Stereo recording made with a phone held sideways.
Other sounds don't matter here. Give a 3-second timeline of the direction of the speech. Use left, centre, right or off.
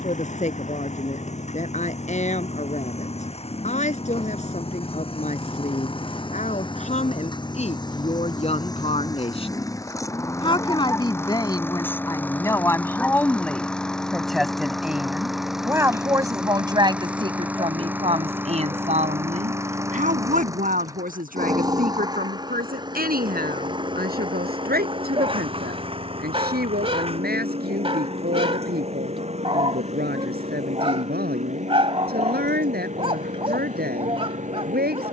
left, left, left, left, centre, right, right, right, right, right, right, right.